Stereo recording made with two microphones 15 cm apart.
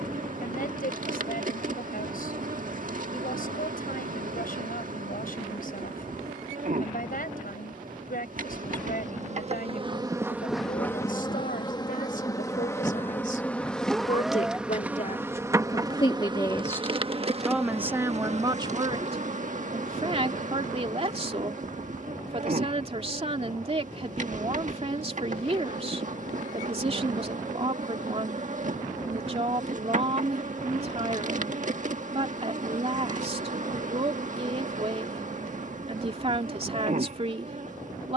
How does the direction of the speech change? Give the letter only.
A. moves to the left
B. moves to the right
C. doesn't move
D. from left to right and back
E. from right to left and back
B.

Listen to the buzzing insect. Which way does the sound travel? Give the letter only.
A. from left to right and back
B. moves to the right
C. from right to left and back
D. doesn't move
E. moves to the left
C.